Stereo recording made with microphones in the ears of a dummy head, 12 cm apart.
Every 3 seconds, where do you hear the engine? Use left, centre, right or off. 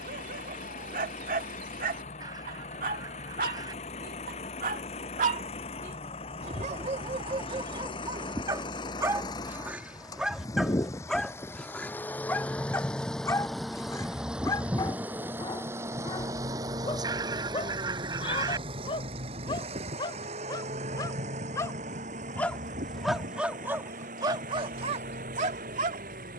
left, left, left, left, centre, right, right, right, right.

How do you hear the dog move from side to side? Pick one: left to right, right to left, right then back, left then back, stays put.
left then back.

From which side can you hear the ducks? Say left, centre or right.
right.